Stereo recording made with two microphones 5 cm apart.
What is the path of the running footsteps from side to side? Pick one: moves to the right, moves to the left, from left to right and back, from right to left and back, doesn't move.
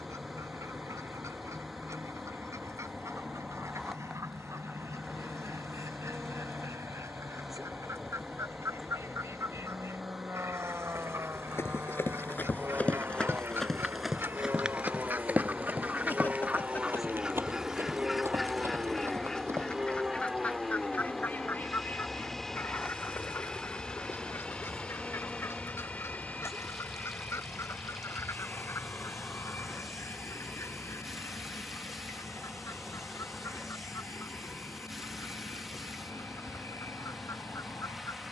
moves to the right.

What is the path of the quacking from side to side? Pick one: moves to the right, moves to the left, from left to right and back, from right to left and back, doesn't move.
moves to the left.